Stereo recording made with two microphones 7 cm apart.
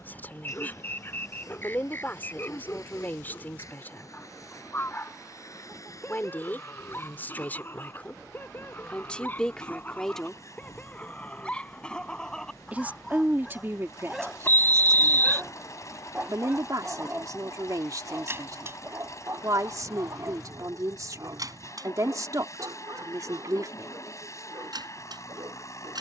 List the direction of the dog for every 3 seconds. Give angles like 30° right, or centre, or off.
30° left, 30° left, 30° left, 20° left, centre, 20° right, 40° right, 60° right, 70° right.